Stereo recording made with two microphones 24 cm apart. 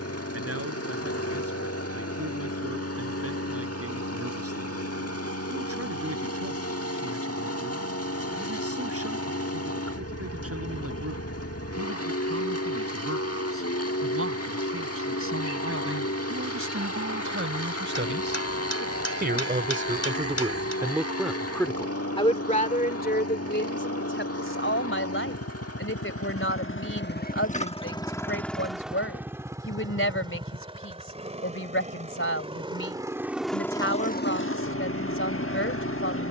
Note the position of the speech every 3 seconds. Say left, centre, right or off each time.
right, right, right, right, right, right, right, left, left, left, left, left.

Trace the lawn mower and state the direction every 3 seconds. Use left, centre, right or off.
left, left, left, left, left, left, left, left, left, centre, right, left.